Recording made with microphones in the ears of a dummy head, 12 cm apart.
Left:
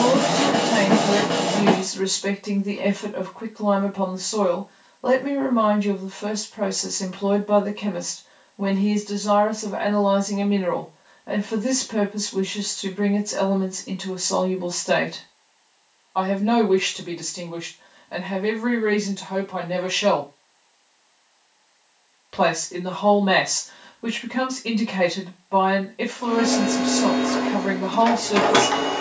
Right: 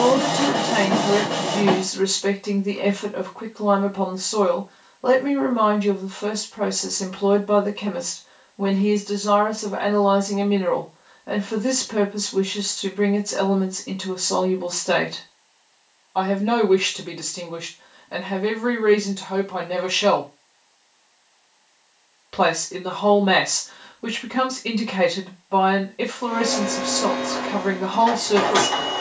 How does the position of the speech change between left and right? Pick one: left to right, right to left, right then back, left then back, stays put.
stays put.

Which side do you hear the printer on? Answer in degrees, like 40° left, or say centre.
70° left.